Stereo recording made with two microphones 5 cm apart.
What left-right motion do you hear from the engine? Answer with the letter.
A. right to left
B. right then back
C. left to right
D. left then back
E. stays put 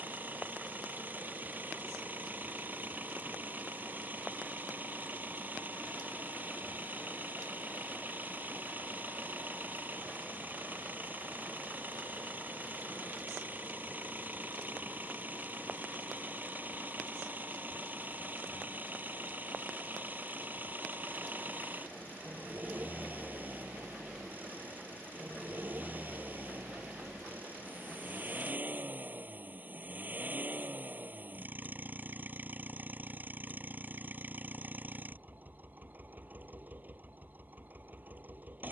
E.